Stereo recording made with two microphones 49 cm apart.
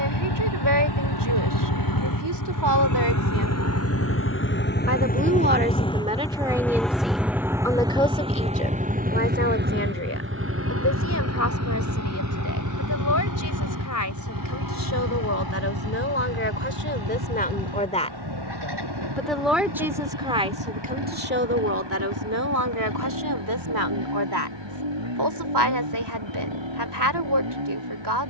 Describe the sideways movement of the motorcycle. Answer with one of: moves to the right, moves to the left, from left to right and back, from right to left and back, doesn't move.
moves to the right.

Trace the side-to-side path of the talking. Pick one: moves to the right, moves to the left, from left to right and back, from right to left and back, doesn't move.
from right to left and back.